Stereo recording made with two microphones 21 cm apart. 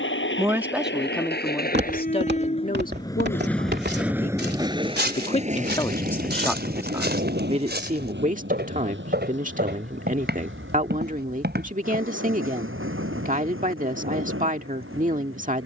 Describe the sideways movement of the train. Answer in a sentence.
You can hear the train travel towards the right.